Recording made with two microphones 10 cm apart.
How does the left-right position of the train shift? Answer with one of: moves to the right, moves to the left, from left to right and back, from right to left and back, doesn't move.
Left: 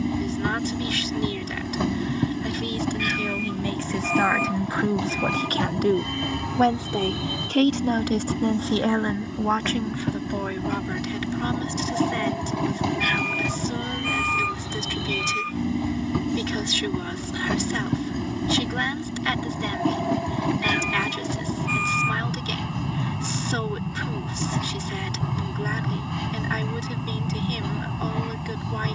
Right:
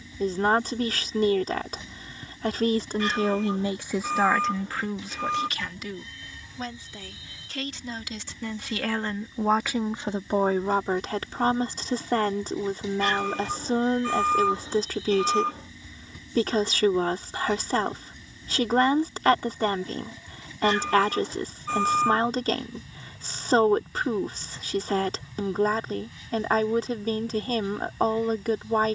doesn't move.